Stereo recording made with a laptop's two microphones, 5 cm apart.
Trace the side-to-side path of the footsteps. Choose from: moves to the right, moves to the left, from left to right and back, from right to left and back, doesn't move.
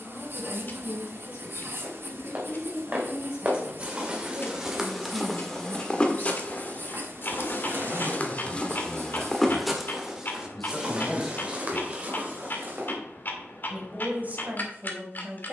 from right to left and back.